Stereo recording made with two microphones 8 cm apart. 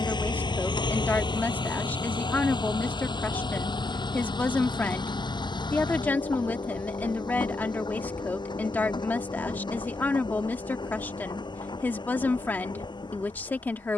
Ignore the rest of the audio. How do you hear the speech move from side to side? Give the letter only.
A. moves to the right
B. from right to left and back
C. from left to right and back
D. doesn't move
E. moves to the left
D.